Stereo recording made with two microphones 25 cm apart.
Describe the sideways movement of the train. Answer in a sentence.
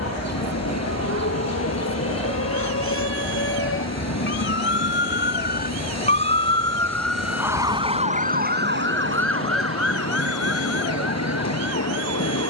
You can hear the train stay put.